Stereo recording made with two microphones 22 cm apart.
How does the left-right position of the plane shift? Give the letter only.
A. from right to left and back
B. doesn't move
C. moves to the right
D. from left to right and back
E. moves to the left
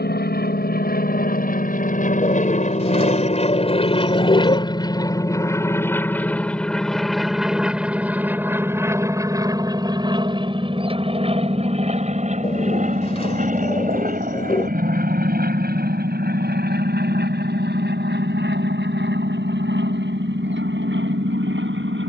C.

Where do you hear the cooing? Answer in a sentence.
In this clip you hear the cooing on the left.